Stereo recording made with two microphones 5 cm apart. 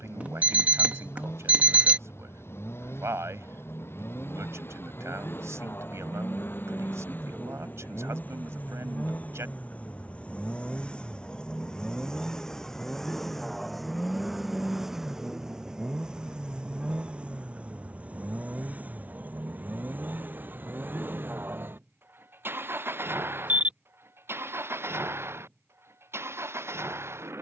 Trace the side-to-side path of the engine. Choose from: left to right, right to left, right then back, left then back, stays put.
left to right.